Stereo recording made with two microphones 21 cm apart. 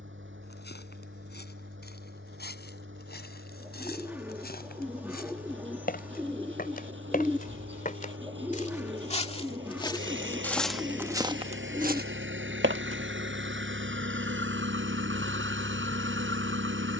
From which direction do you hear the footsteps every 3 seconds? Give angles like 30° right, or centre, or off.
60° left, 50° left, 40° left, centre, 70° right, off.